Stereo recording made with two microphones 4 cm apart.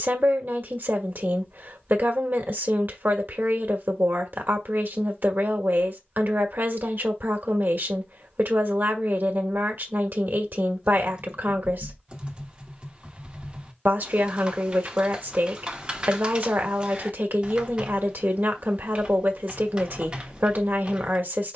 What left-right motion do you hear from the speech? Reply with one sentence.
In this clip you hear the speech stay put.